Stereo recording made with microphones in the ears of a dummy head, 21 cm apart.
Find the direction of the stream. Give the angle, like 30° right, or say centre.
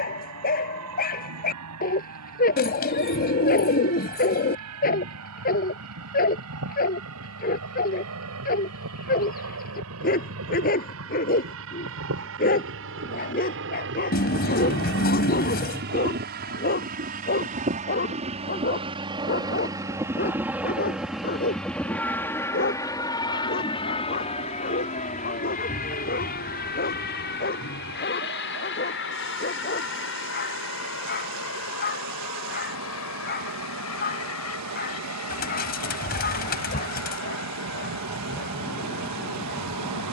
80° right.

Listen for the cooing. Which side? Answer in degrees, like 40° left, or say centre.
40° left.